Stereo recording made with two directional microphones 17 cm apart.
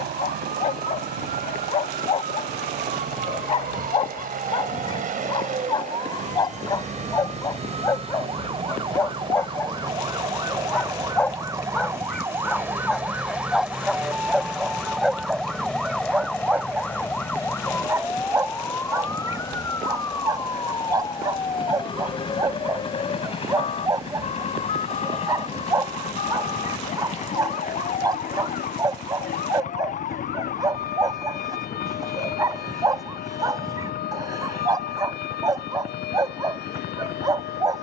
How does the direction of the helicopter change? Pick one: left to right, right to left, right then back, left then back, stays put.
right to left.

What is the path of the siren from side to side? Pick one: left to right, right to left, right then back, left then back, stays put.
right to left.